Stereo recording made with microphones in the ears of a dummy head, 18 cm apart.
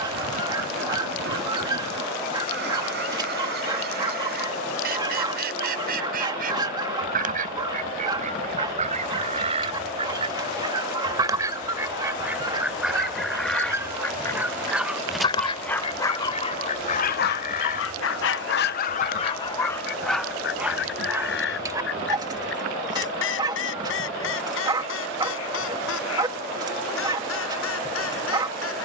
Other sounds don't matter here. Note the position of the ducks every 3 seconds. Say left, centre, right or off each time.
right, right, right, right, centre, left, left, left, left, left.